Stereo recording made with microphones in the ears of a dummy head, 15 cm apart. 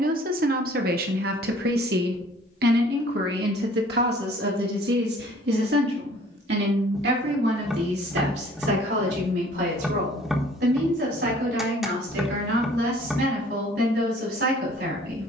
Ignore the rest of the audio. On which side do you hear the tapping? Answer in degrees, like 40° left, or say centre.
centre.